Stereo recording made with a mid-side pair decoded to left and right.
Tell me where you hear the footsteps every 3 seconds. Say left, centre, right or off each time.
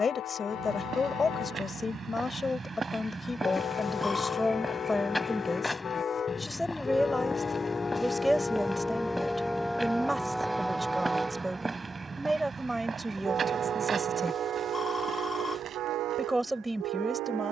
right, centre, centre, centre, right, right.